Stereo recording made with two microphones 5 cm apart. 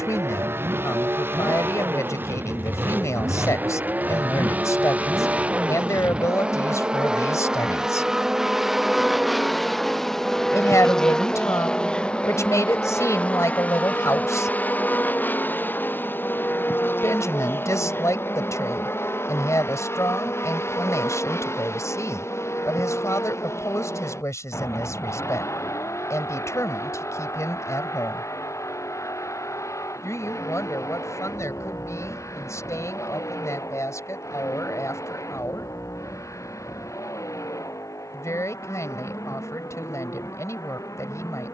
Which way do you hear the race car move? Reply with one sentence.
You can hear the race car move from right to left.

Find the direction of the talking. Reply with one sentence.
In this clip you hear the talking on the left.